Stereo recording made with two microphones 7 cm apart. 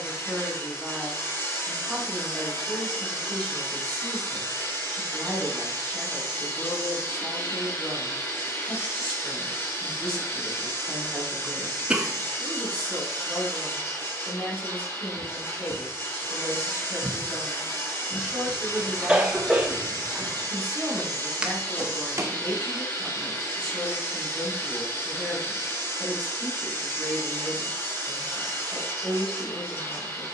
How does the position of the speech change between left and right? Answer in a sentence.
In this clip you hear the speech stay in one place.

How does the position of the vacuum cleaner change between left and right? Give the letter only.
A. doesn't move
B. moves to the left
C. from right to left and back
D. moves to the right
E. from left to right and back
A.